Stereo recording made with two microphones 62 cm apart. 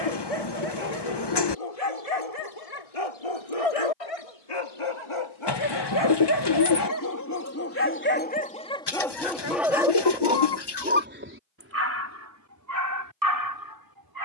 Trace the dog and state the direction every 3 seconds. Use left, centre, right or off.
left, left, left, centre, right.